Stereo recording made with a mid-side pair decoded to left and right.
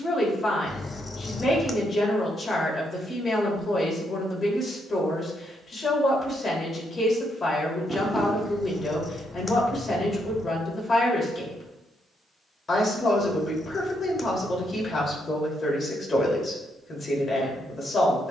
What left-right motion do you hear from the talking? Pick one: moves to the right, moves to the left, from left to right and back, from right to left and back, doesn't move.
doesn't move.